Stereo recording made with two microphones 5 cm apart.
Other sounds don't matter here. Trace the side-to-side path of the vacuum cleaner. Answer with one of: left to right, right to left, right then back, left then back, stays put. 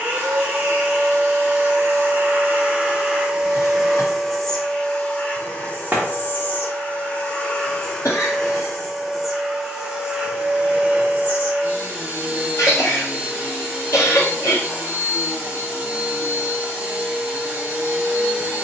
left then back.